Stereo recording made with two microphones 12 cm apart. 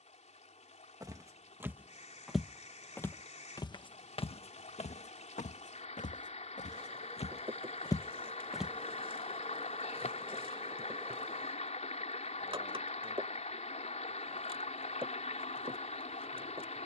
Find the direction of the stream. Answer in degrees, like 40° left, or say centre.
60° left.